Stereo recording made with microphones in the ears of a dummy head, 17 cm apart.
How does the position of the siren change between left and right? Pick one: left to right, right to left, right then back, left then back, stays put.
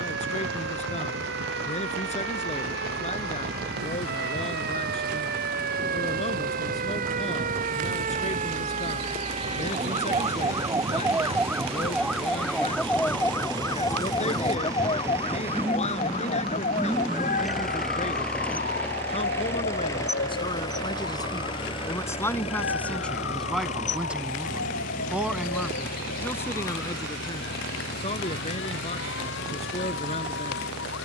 right to left.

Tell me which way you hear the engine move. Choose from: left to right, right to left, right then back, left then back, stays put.
right to left.